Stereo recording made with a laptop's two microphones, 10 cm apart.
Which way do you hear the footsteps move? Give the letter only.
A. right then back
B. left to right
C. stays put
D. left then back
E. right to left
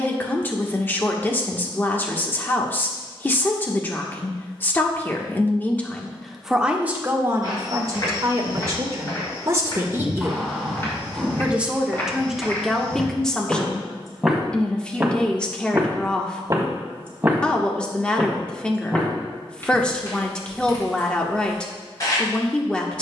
A.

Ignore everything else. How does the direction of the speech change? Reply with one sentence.
You can hear the speech move from left to right and back again.